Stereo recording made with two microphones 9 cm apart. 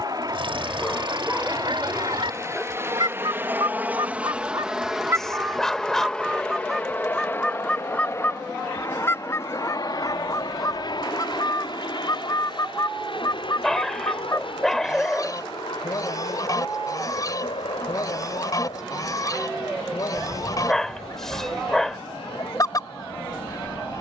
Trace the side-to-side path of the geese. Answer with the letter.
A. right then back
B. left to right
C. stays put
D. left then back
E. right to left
E.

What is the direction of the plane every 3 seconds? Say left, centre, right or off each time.
right, centre, left, left, left, left, left, left.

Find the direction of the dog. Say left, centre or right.
centre.